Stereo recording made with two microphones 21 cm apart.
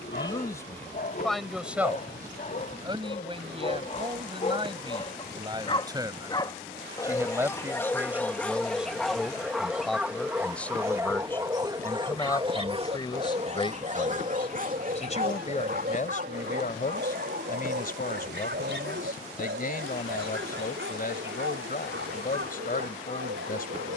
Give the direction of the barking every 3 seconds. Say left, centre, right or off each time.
left, left, centre, centre, right, right, right, right.